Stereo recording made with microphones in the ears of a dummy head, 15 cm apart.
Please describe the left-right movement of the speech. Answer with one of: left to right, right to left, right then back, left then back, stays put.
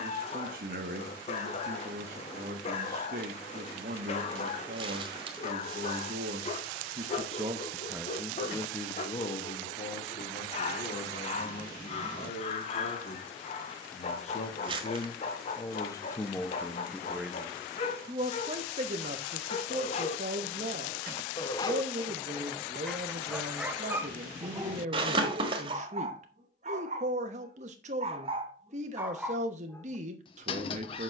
left then back.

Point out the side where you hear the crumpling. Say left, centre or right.
right.